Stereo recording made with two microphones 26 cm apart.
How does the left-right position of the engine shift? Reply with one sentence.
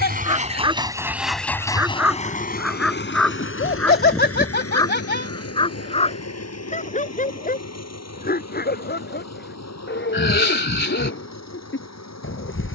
You can hear the engine travel towards the left.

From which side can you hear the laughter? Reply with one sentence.
In this clip you hear the laughter on the left.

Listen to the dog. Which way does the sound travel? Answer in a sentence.
In this clip you hear the dog move to the left.